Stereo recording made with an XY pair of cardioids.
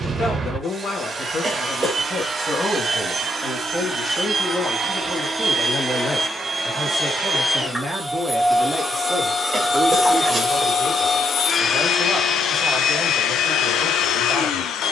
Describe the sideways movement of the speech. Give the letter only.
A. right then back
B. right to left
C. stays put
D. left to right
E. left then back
D.